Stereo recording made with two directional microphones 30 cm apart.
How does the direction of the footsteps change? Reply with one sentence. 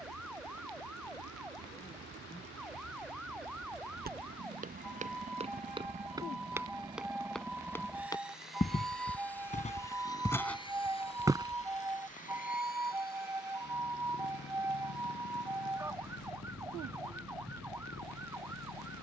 You can hear the footsteps move from right to left and back again.